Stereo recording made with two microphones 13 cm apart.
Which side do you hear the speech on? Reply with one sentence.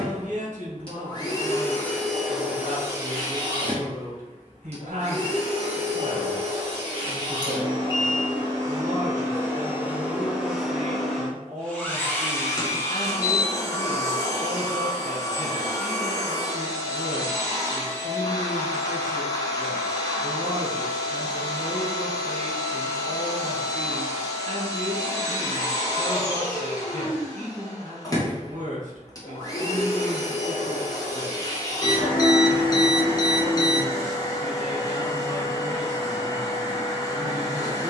You can hear the speech on the right.